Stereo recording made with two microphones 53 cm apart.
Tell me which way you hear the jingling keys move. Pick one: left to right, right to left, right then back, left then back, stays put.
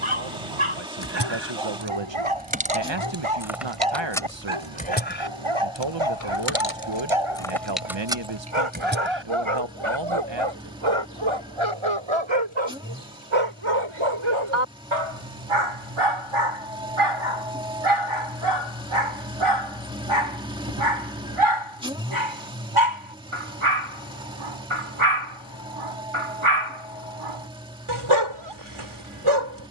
left then back.